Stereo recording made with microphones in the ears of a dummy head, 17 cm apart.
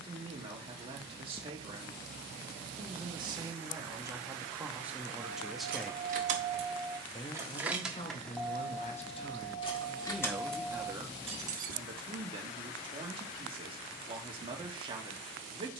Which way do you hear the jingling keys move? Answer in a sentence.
You can hear the jingling keys go left and come back.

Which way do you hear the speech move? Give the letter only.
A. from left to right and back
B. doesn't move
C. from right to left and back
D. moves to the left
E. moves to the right
C.